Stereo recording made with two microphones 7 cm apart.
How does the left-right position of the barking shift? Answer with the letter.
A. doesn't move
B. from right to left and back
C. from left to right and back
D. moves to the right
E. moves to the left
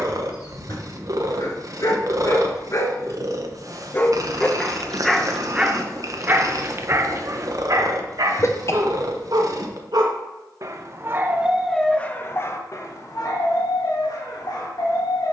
C.